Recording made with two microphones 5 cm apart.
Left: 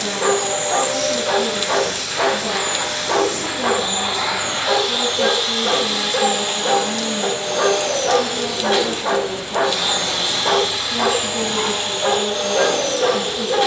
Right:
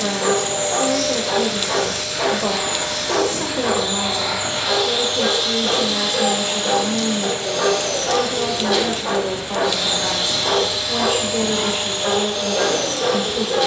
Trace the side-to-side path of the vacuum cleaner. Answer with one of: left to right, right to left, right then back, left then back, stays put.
stays put.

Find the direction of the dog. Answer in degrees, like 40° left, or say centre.
20° left.